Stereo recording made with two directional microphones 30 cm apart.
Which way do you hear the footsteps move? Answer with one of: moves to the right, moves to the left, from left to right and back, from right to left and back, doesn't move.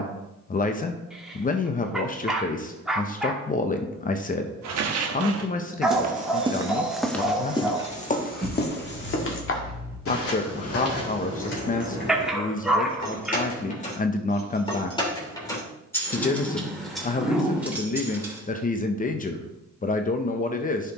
moves to the left.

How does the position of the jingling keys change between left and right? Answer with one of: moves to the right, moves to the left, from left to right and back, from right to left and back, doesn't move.
from right to left and back.